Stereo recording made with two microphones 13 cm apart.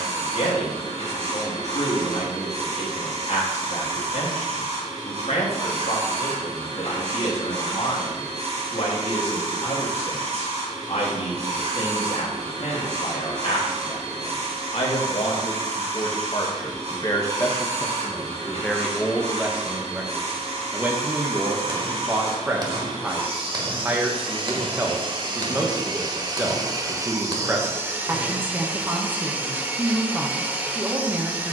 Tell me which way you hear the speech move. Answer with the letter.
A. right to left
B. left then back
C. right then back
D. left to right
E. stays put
D.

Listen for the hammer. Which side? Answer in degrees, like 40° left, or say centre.
30° right.